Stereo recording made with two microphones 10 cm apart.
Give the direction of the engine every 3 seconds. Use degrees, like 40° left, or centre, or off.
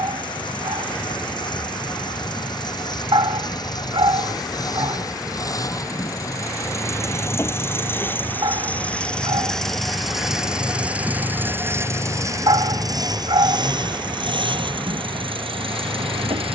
50° left, 40° left, 20° left, 10° right, 50° right, 70° right.